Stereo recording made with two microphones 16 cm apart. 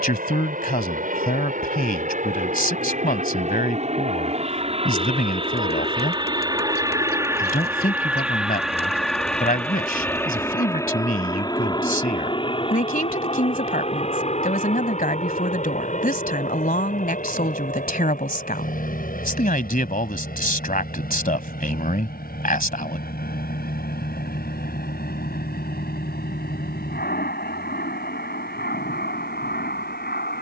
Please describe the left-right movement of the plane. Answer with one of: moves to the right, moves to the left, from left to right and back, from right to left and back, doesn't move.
moves to the left.